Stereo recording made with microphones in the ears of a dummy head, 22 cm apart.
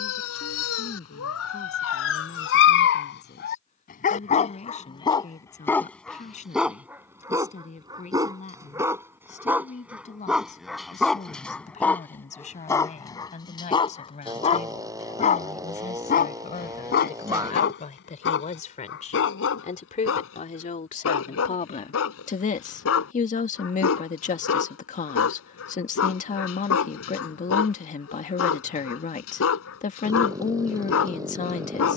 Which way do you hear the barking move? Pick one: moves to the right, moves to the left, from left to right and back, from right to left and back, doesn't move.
from left to right and back.